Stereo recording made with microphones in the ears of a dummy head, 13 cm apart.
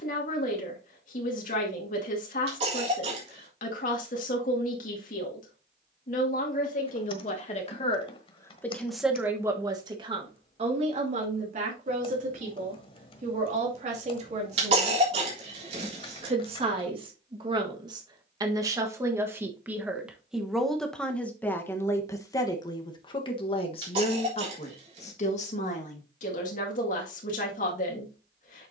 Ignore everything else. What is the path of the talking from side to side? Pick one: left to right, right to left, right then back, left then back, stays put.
right then back.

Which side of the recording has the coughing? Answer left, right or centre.
right.